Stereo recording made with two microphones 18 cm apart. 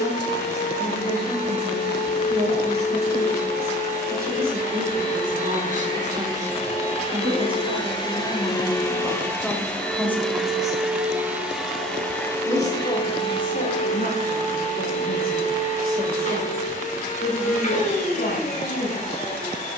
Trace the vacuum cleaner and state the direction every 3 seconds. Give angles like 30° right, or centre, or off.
50° left, 40° left, 30° left, centre, 30° left, 40° left, 40° left.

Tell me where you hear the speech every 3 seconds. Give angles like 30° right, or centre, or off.
60° right, 50° right, 30° right, 10° left, 50° left, 60° left, 70° left.